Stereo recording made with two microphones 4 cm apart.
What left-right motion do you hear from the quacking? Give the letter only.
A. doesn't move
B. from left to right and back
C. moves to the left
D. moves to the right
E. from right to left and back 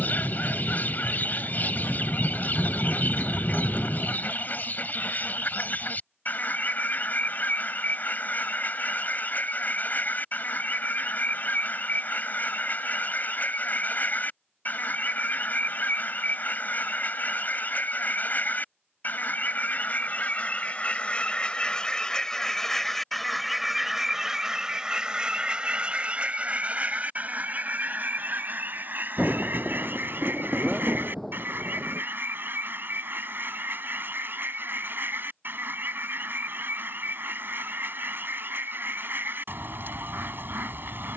D.